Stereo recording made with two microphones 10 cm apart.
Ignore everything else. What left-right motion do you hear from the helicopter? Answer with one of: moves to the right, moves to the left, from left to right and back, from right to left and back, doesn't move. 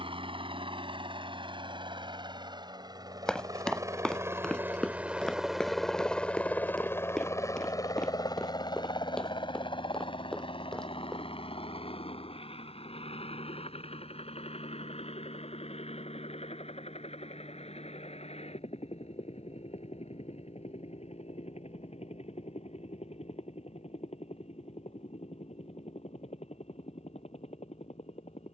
moves to the left.